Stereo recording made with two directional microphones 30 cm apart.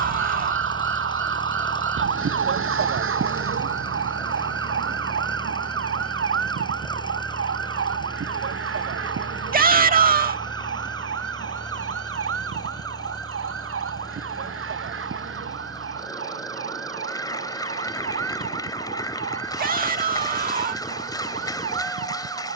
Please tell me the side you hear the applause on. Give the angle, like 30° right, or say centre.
10° left.